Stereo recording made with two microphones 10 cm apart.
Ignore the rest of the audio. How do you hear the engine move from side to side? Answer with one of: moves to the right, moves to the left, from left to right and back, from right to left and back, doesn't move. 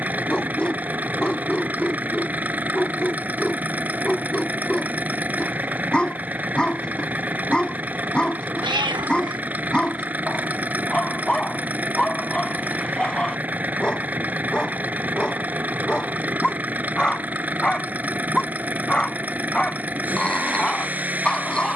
doesn't move.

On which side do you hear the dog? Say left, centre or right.
centre.